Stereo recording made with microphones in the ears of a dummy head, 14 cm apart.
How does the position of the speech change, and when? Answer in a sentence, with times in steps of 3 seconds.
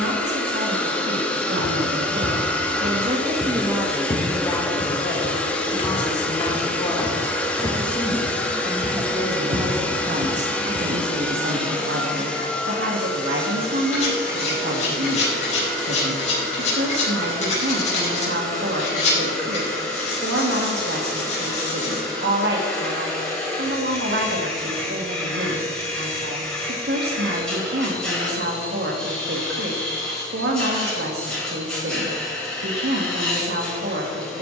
You can hear the speech on the right from 0 s, in the centre from 3 s and on the right from 9 s.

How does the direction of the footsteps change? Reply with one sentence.
You can hear the footsteps move from right to left and back again.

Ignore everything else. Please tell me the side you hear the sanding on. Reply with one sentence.
In this clip you hear the sanding on the left.